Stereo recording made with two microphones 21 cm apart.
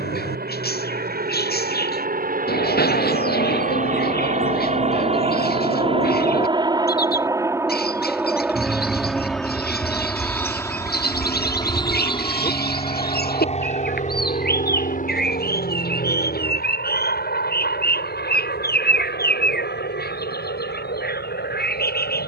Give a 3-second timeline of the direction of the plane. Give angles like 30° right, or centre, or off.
50° right, 40° right, 10° right, 10° left, 30° left, 40° left, 50° left, 60° left.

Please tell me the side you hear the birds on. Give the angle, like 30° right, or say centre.
50° left.